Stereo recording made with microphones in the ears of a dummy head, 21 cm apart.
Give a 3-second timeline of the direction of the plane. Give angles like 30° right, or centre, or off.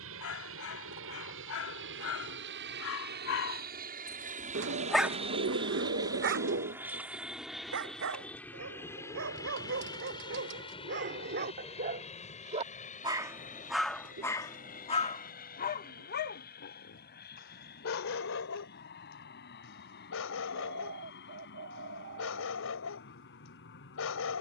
60° right, 30° right, centre, 20° left, 30° left, 40° left, 50° left, 50° left.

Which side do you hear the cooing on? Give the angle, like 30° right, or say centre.
50° right.